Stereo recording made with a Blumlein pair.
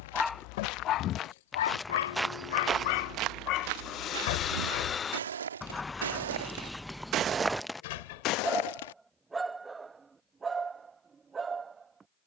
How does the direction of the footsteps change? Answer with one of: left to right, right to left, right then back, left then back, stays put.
right then back.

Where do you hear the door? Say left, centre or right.
left.